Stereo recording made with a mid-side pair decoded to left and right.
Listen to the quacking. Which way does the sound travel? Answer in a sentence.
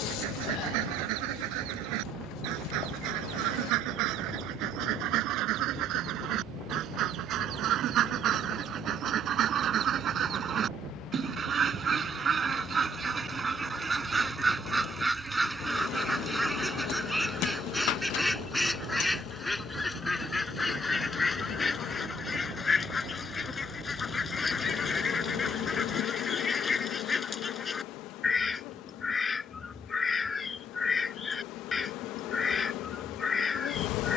You can hear the quacking travel towards the left.